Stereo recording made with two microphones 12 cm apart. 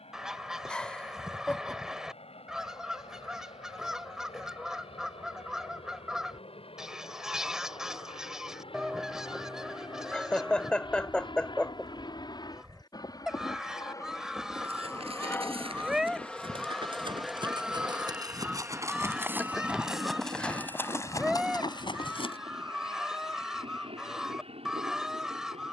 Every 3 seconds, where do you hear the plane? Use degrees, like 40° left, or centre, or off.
70° left, 70° left, 60° left, 50° left, 30° left, 10° left, 20° right, 40° right, 50° right.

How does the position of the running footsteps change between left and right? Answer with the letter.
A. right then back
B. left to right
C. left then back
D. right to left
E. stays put
D.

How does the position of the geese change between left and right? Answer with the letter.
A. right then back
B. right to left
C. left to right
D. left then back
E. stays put
E.